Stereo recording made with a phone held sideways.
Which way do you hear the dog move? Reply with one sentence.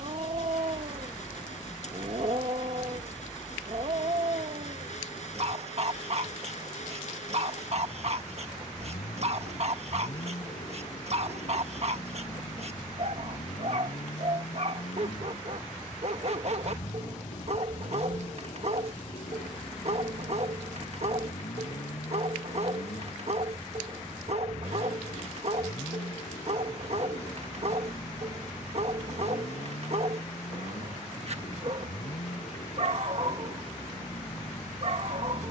You can hear the dog stay in one place.